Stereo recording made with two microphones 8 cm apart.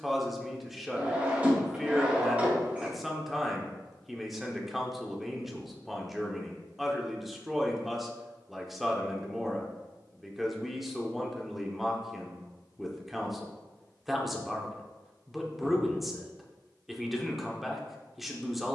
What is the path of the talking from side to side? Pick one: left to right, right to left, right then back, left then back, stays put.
stays put.